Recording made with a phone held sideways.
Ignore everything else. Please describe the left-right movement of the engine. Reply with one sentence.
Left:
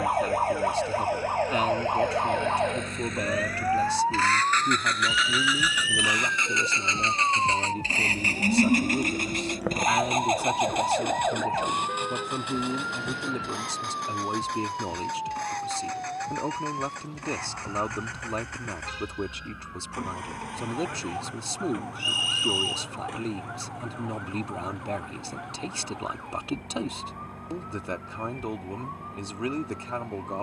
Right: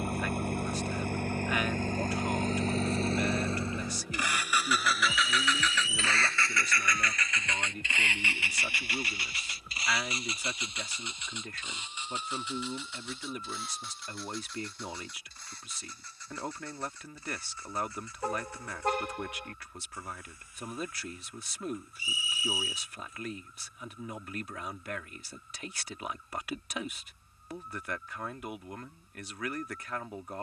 In this clip you hear the engine move to the left.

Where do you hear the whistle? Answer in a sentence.
You can hear the whistle on the left.